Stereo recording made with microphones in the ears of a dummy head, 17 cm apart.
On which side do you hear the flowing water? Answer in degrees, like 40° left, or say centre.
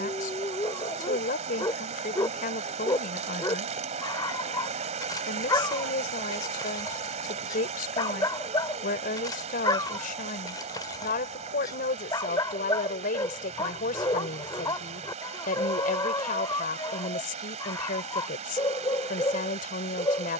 40° right.